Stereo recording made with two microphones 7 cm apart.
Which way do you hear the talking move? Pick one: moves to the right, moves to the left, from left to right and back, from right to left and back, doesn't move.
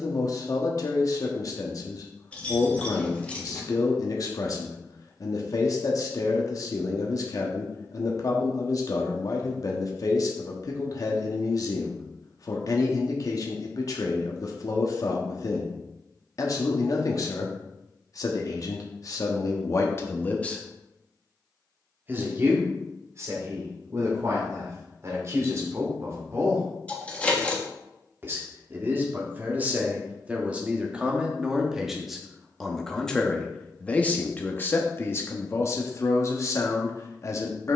from left to right and back.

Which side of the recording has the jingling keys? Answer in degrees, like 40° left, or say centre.
20° left.